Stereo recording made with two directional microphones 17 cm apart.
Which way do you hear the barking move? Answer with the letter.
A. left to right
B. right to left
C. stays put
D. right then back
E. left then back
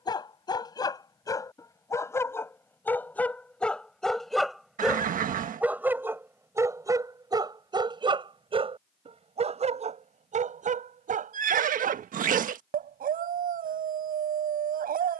A.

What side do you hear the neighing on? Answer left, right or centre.
right.